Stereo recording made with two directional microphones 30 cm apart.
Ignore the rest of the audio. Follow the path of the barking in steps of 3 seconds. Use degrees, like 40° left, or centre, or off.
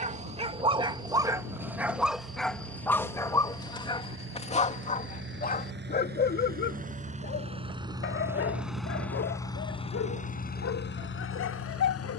10° right, 20° left, 40° left, 50° left.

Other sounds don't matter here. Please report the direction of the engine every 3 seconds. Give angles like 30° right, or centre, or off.
50° right, 40° right, 20° right, 30° left.